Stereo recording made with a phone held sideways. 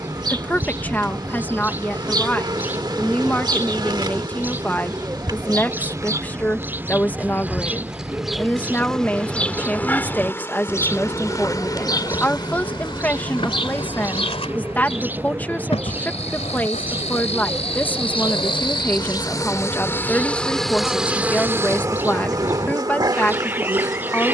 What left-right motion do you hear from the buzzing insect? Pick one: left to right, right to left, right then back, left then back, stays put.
left then back.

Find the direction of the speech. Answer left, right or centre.
centre.